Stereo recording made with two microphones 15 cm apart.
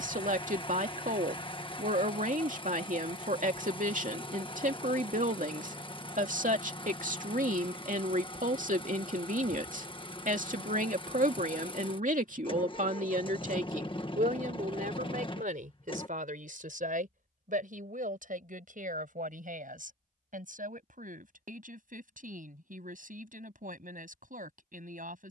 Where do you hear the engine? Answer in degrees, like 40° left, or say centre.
40° left.